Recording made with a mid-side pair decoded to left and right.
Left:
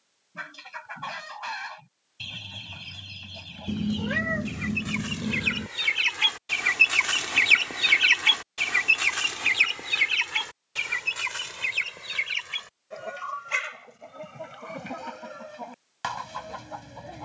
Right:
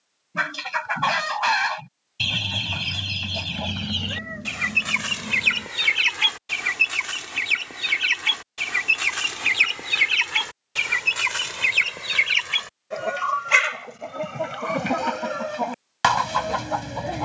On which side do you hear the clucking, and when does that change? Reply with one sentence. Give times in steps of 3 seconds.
You can hear the clucking on the right from 0 s, in the centre from 6 s and on the right from 9 s.